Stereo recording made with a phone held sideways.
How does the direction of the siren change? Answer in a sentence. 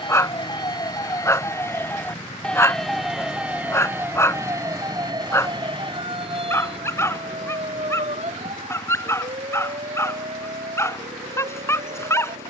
In this clip you hear the siren move from left to right.